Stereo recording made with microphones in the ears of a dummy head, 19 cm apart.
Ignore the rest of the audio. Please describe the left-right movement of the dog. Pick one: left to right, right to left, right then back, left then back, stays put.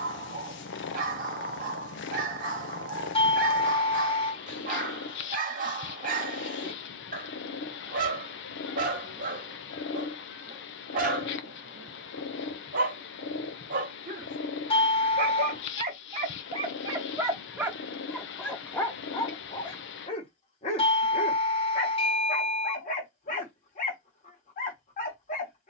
right to left.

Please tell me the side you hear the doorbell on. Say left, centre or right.
left.